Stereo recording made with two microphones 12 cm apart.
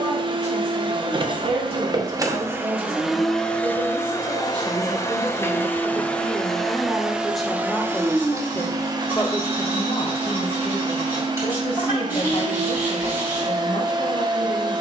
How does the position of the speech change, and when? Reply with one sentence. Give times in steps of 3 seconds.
You can hear the speech on the right from 0 s, in the centre from 6 s and on the left from 9 s.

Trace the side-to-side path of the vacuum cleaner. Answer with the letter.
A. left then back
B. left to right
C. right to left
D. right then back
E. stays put
A.